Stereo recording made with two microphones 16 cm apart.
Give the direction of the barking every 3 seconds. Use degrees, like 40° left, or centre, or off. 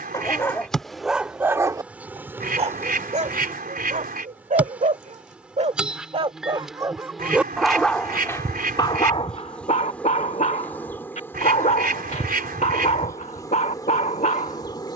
10° right, 50° right, centre, 40° left, 50° left.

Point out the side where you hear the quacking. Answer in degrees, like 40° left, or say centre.
60° right.